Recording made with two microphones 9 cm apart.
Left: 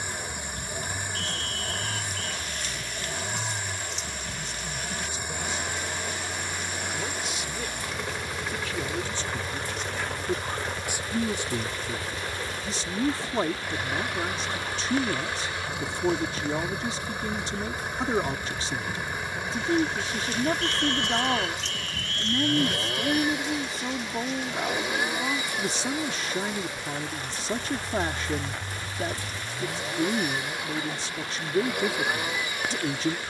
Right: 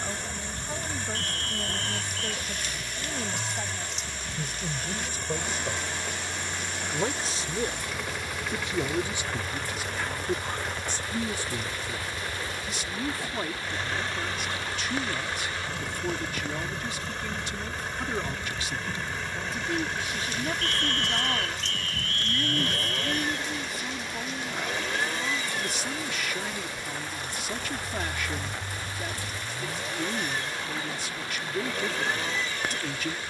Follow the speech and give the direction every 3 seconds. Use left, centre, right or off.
right, right, right, centre, left, left, left, left, left, left, left.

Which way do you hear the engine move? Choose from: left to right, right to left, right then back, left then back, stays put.
stays put.